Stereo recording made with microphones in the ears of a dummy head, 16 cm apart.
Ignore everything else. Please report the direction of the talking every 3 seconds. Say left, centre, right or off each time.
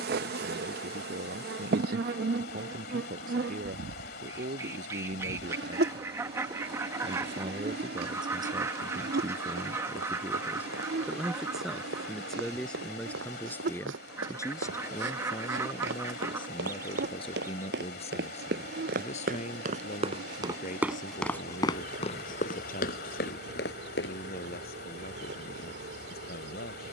right, right, right, centre, centre, left, left, left, left.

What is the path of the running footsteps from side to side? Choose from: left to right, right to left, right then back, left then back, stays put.
right to left.